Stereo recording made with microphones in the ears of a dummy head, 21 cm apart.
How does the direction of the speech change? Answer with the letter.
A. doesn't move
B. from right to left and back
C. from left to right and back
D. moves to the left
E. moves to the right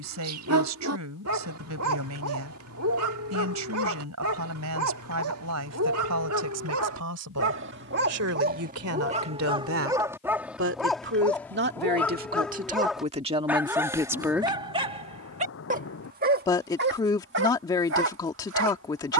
D.